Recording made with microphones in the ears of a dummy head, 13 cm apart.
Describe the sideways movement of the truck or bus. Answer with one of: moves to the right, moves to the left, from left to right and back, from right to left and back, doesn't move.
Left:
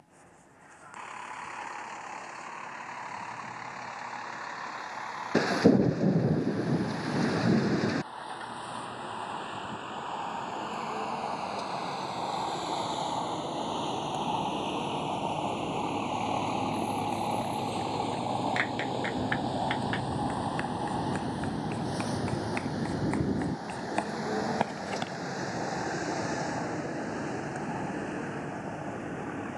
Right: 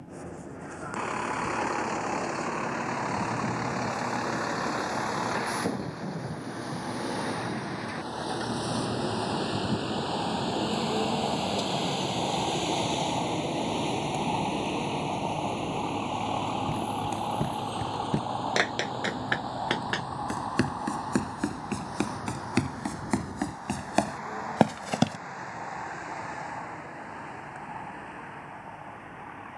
moves to the left.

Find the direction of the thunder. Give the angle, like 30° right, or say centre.
60° left.